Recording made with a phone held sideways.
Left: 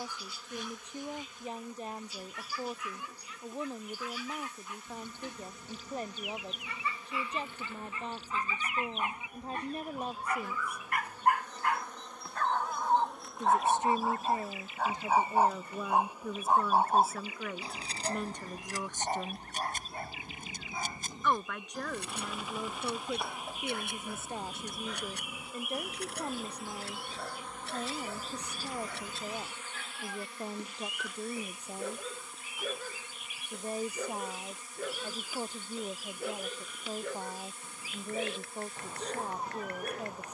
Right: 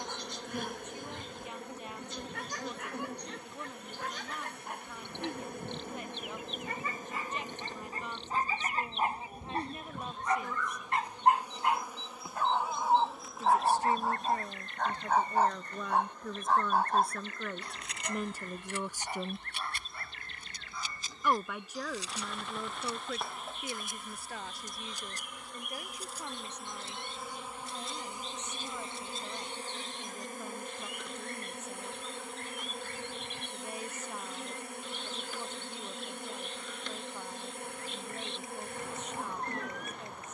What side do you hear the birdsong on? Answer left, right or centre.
centre.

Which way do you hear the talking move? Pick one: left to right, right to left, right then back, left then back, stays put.
right then back.